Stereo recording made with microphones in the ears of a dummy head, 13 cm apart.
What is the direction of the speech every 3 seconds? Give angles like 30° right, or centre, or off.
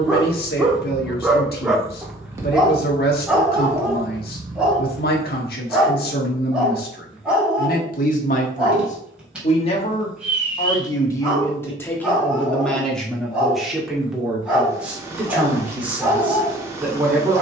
70° left, 70° left, 60° left, 30° left, centre, 10° right.